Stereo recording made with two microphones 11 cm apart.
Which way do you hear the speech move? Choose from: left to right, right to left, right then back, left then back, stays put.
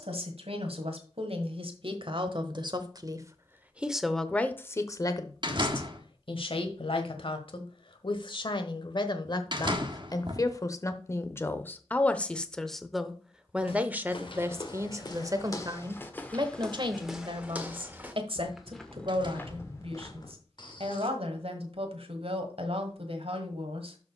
left then back.